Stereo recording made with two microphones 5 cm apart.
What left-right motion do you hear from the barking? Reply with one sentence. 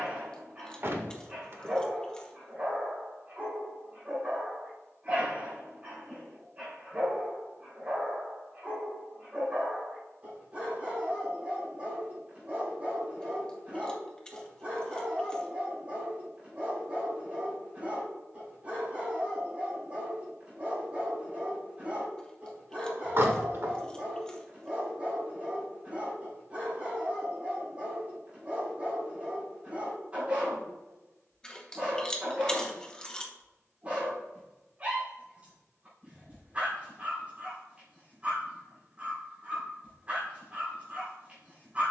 In this clip you hear the barking stay put.